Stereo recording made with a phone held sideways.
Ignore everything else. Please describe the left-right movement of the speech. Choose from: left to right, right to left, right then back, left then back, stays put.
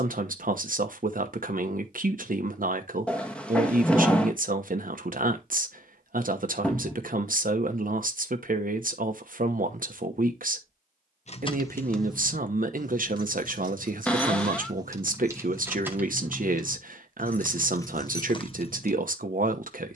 stays put.